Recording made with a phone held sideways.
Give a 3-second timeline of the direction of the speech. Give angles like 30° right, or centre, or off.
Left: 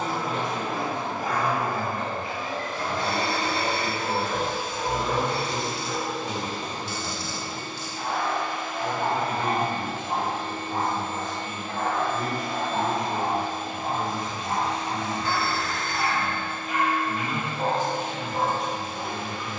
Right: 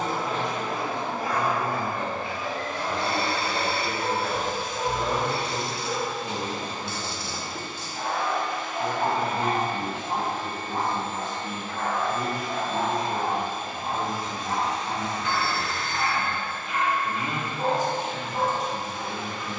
50° left, 40° left, 20° left, 30° right, 40° right, 40° right, 40° right.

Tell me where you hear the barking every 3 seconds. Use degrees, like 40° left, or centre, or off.
60° right, 60° right, 50° right, centre, 40° left, 40° left, 40° left.